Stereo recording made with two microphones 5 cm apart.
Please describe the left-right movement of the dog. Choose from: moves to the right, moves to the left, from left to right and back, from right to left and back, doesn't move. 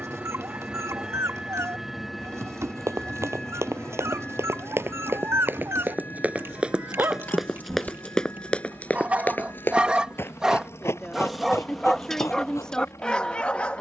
moves to the left.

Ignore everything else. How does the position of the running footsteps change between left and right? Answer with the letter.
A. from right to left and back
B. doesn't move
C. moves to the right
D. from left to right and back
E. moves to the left
E.